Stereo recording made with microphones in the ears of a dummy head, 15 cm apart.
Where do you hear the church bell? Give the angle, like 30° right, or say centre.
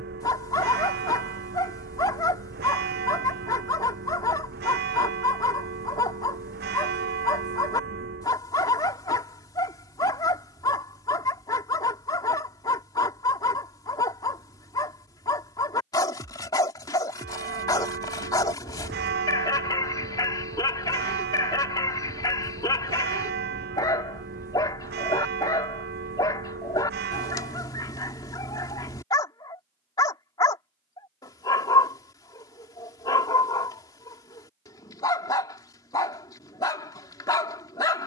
70° right.